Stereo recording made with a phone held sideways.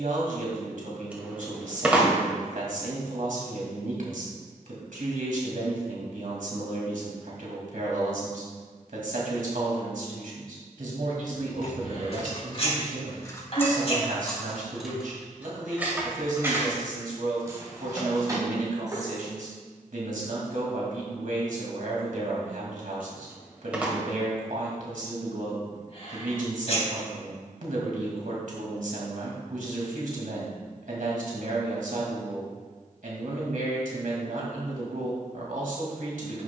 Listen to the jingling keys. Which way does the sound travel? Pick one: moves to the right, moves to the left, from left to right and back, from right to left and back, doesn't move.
moves to the right.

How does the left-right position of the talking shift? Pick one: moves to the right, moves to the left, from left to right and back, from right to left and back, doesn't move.
doesn't move.